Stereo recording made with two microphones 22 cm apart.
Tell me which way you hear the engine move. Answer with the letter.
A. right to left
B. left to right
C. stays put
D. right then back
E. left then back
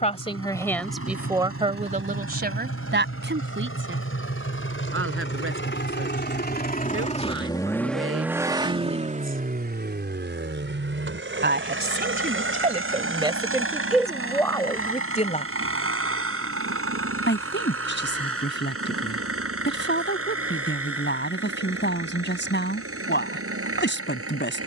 B.